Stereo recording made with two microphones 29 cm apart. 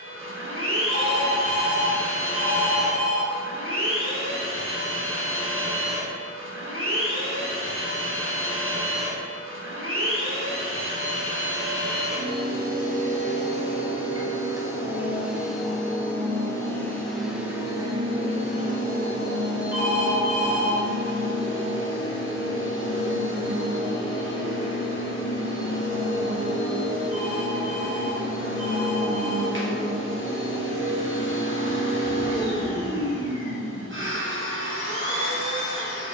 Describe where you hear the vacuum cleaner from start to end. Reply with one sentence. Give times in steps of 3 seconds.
You can hear the vacuum cleaner on the right from 0 s, in the centre from 15 s and on the right from 18 s.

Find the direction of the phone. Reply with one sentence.
You can hear the phone on the left.